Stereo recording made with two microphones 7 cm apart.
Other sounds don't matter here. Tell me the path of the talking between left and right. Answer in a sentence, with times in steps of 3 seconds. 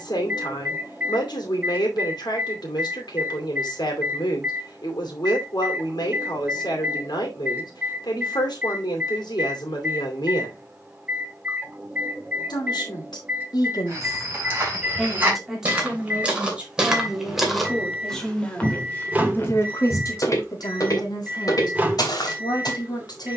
You can hear the talking on the left from 0 s, in the centre from 15 s and on the left from 18 s.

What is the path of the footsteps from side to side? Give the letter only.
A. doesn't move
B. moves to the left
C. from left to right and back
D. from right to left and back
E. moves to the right
B.